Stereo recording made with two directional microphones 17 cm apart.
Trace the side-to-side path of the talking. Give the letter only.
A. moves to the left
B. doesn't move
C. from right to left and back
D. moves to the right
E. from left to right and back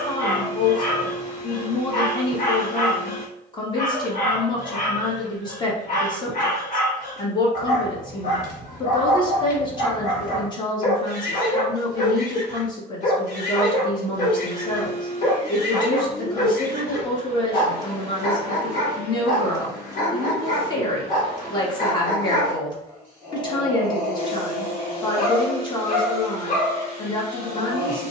B.